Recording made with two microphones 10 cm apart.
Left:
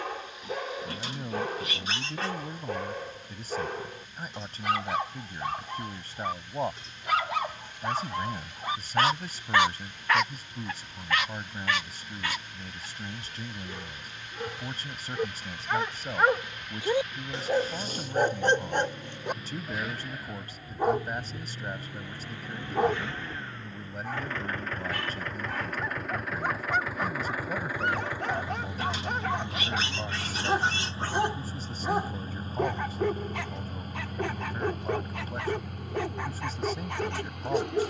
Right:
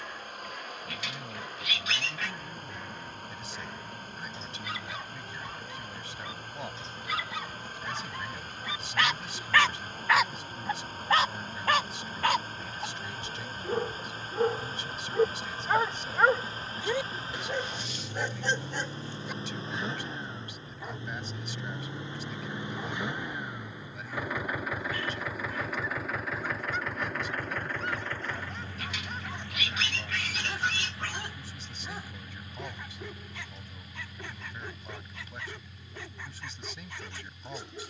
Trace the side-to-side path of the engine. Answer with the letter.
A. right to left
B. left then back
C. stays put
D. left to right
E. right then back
A.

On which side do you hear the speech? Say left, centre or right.
left.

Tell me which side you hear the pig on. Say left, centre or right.
left.